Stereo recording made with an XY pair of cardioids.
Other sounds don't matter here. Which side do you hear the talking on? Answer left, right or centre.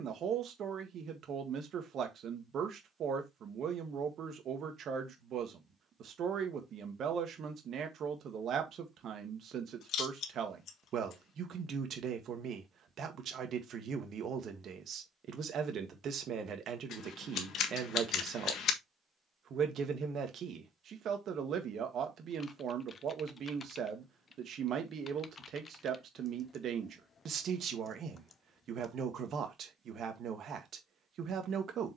right.